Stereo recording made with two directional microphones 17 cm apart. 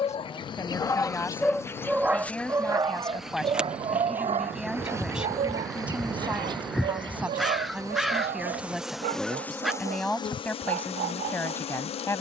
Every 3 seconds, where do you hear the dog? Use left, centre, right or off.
centre, right, right, right.